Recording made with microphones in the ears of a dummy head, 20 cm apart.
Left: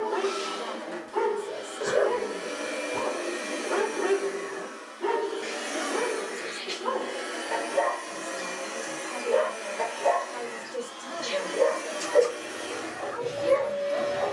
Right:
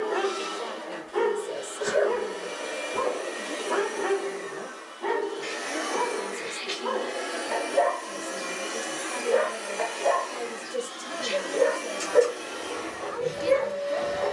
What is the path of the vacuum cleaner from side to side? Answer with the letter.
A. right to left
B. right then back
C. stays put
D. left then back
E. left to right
B.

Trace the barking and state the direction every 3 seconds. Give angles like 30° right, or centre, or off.
20° right, 10° left, centre, 10° right, 10° right.